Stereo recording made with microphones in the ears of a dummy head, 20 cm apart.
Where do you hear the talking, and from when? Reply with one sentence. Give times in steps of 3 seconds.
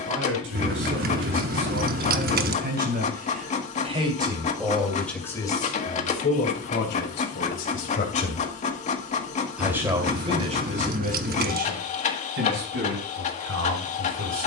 In this clip you hear the talking on the right from 0 s, in the centre from 3 s, on the left from 6 s and on the right from 9 s.